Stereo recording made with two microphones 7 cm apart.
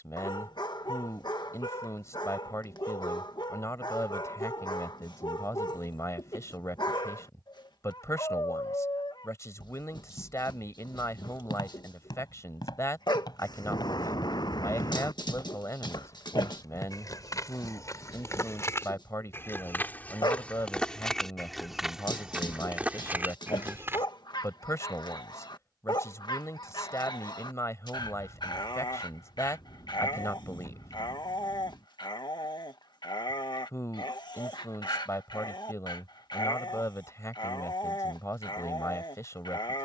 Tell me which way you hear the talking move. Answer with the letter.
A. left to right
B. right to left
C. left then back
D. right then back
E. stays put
E.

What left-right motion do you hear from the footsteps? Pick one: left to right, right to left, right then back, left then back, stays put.
left to right.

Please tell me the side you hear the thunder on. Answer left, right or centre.
left.